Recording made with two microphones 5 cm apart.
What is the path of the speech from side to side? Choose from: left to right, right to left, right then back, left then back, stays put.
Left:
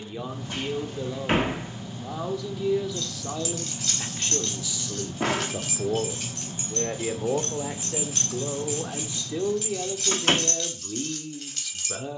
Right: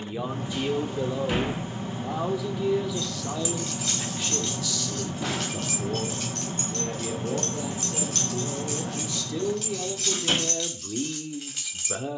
left then back.